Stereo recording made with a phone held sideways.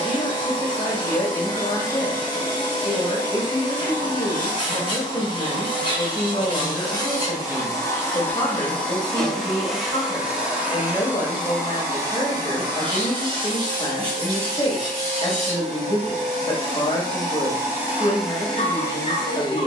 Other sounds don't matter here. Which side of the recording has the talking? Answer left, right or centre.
left.